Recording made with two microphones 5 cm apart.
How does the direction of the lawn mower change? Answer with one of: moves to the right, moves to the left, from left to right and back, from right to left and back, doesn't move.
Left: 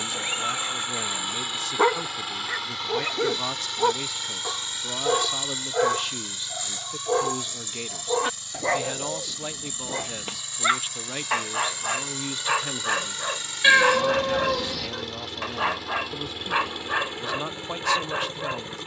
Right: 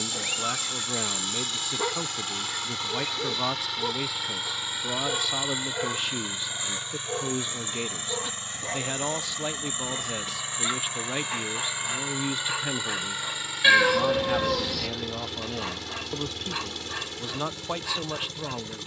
from left to right and back.